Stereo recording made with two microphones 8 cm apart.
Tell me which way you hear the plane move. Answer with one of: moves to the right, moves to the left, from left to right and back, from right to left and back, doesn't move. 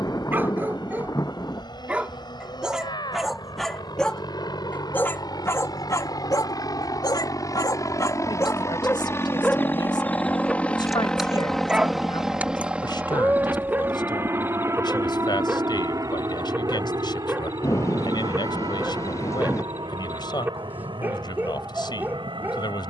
moves to the right.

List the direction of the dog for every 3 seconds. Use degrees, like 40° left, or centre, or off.
20° right, 20° left, 40° left, 10° left, 20° right, 20° right, 20° right, 20° right.